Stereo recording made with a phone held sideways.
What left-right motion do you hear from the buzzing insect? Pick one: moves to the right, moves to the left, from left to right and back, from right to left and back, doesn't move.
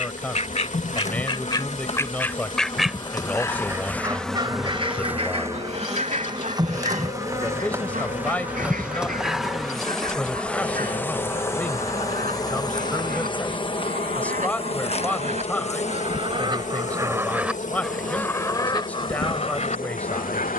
from left to right and back.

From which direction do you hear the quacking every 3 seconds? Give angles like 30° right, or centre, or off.
20° left, 30° right, 50° right, 60° right, 60° right, 30° right, 30° left.